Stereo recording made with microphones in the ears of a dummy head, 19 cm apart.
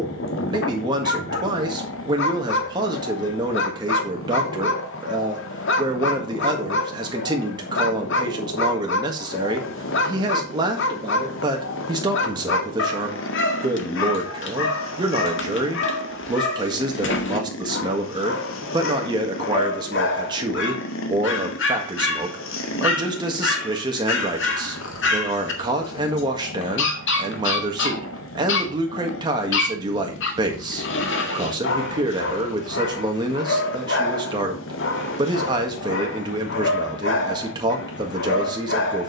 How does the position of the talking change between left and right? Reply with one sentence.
You can hear the talking stay put.